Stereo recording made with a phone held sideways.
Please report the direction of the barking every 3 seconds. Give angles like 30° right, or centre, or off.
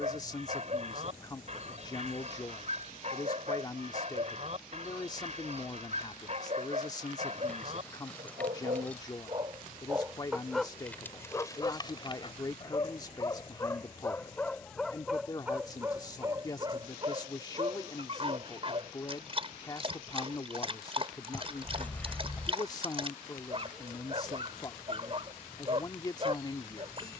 50° right, 50° right, 50° right, centre, 20° left, 20° right, 40° right, 40° right, 40° right.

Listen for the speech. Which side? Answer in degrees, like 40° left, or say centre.
20° left.